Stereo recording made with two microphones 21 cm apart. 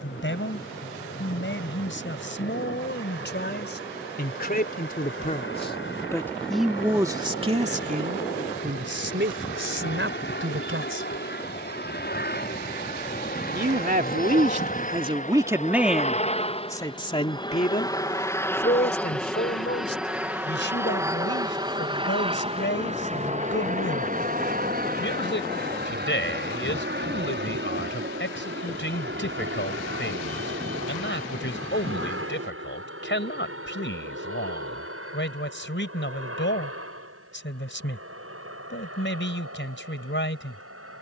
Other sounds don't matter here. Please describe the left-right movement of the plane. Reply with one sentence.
In this clip you hear the plane move from left to right.